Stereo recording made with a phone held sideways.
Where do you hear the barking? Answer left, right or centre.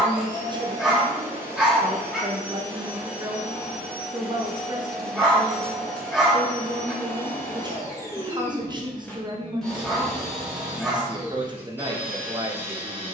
centre.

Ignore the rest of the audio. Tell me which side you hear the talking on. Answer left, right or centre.
right.